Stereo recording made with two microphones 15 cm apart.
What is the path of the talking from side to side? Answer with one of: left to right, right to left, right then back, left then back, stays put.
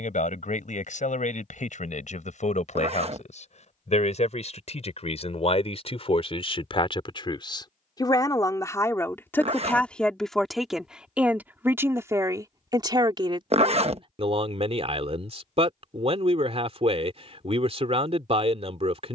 left to right.